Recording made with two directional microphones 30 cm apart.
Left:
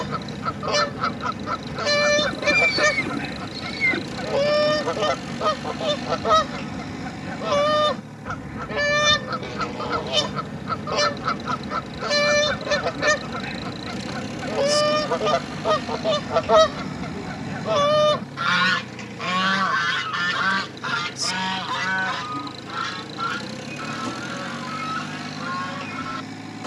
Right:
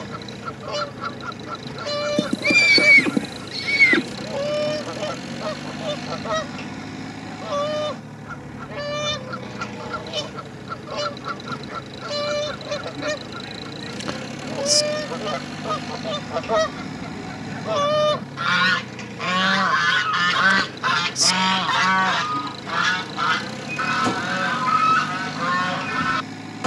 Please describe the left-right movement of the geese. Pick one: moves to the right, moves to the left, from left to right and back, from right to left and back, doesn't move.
moves to the right.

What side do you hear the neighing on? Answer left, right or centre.
right.